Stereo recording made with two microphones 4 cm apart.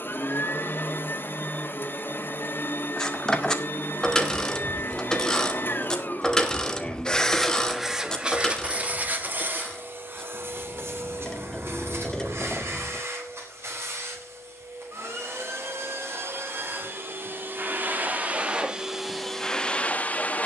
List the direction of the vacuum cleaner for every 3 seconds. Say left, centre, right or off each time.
left, left, centre, right, right, right, centre.